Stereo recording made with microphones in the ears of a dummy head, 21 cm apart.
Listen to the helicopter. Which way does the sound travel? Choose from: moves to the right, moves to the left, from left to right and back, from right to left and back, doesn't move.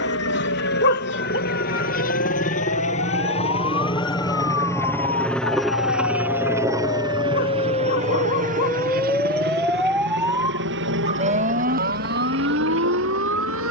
moves to the right.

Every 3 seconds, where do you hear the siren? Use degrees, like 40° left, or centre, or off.
60° left, 50° left, 30° left, 10° right, 50° right.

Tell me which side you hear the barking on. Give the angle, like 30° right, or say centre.
50° left.